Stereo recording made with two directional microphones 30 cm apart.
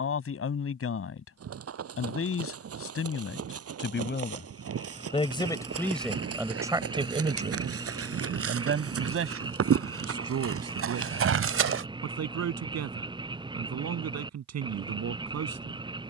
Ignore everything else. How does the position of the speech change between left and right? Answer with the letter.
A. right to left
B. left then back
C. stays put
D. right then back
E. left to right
E.